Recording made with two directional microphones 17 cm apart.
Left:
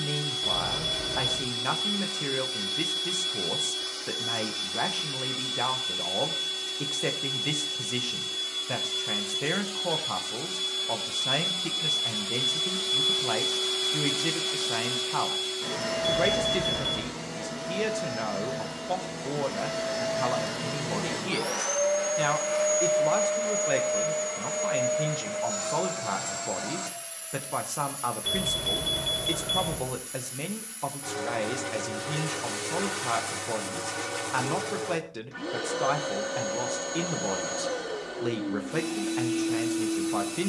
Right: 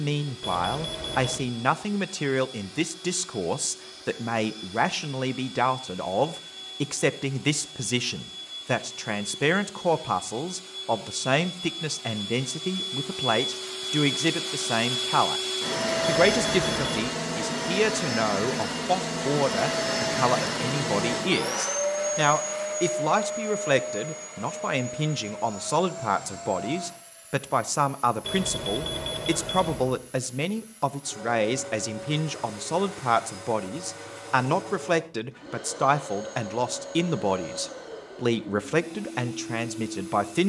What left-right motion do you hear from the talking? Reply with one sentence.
In this clip you hear the talking stay put.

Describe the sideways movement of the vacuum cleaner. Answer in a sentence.
You can hear the vacuum cleaner go right and come back.